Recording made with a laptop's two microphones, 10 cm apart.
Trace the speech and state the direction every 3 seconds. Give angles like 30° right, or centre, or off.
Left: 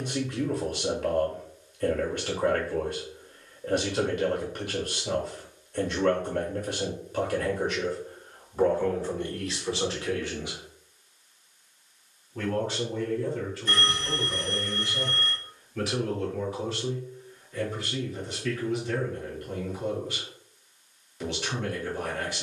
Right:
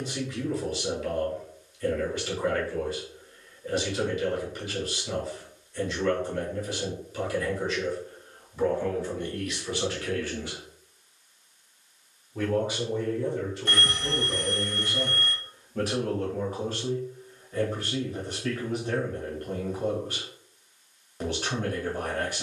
60° left, 60° left, 50° left, 30° left, 30° right, 50° right, 50° right, 50° right.